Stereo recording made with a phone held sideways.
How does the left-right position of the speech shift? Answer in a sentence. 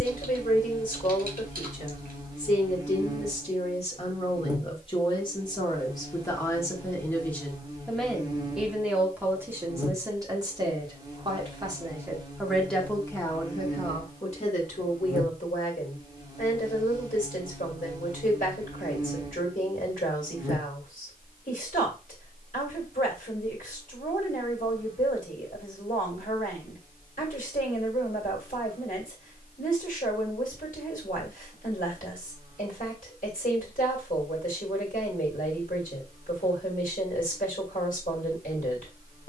You can hear the speech go right and come back.